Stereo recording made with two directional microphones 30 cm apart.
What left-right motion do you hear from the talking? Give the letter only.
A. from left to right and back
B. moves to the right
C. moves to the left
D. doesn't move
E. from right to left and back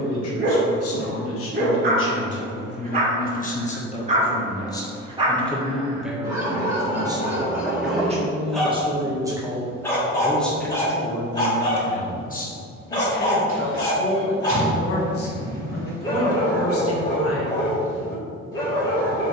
A.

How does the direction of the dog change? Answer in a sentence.
You can hear the dog move to the left.